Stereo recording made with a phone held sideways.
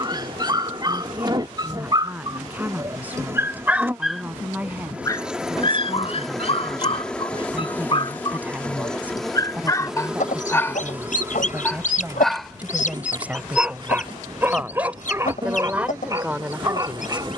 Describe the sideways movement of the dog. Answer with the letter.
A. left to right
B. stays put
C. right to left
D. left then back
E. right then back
D.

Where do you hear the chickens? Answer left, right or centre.
left.